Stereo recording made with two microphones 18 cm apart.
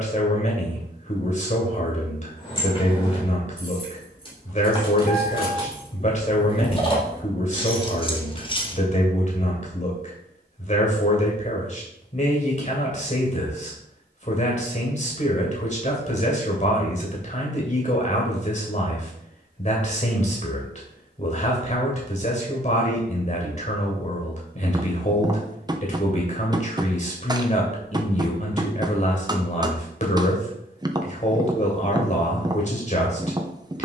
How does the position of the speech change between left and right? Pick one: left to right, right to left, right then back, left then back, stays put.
stays put.